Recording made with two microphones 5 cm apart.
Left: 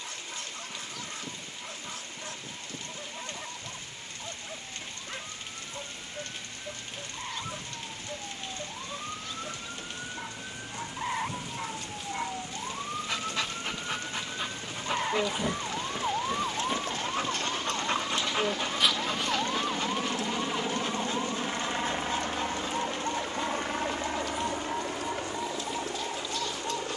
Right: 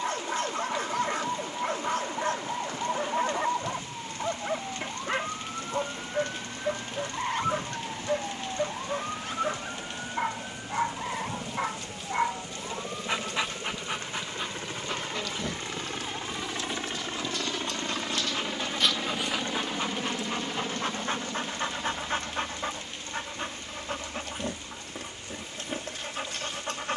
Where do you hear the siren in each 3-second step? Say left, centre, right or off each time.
right, right, right, centre, left, left, left, left, left.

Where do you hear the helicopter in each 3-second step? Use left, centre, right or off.
right, right, right, right, right, right, centre, left, left.